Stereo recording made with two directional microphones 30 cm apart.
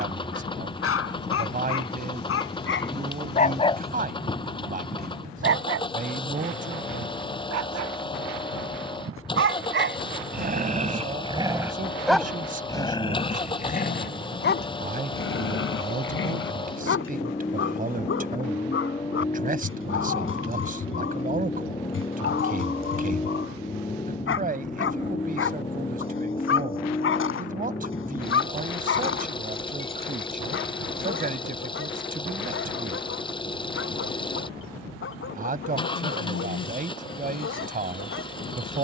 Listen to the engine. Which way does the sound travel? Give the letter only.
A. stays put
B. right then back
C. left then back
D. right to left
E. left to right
A.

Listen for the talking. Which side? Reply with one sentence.
In this clip you hear the talking on the right.